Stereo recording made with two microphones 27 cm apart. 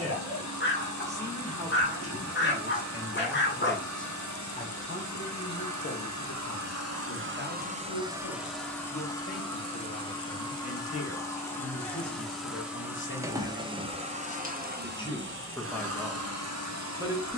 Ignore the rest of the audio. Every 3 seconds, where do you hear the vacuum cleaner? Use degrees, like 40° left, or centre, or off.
80° right, 80° right, 40° right, 10° left, 20° right, 60° right.